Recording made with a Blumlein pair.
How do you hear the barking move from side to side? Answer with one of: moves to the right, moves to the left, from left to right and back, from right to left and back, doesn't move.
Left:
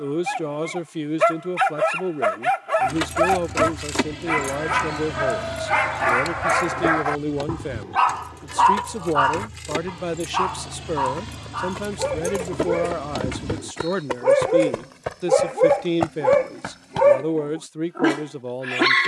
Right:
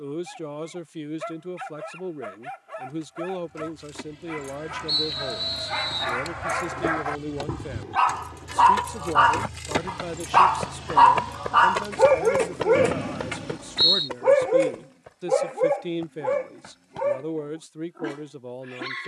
from left to right and back.